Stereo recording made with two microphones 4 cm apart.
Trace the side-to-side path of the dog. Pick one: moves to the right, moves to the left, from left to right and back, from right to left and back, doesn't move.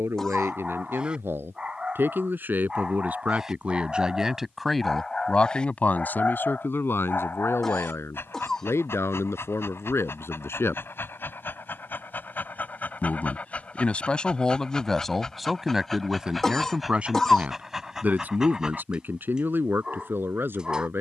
from right to left and back.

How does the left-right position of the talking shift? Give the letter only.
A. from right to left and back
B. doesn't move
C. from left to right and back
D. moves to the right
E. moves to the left
A.